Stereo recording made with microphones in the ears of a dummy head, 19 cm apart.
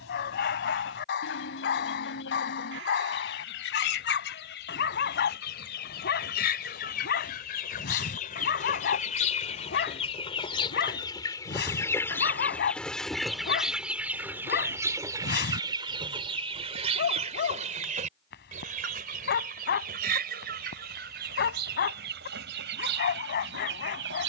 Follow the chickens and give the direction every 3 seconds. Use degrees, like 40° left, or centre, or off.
60° left, 60° left, 40° left, 20° left, centre, 30° right, 50° right, 60° right.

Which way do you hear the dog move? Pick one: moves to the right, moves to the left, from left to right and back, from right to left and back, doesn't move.
doesn't move.